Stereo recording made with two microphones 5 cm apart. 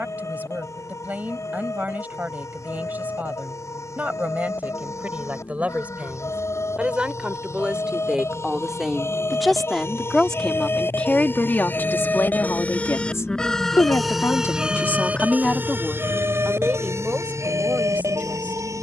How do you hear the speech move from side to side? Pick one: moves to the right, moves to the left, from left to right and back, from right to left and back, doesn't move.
from right to left and back.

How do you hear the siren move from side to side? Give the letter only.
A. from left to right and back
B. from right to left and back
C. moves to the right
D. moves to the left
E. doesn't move
C.